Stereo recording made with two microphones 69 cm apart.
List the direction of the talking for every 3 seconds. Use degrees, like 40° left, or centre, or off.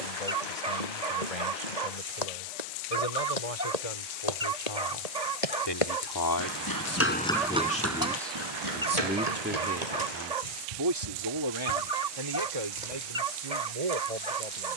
60° left, 50° left, 10° left, 30° right, 50° right.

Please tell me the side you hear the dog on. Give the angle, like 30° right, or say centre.
80° right.